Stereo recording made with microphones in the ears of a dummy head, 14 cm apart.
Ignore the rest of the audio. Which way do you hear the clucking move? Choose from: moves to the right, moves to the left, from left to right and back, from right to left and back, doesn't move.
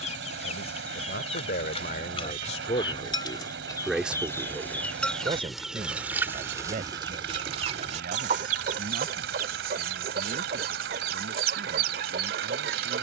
moves to the right.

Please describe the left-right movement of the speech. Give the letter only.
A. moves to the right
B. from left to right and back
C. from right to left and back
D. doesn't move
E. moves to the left
A.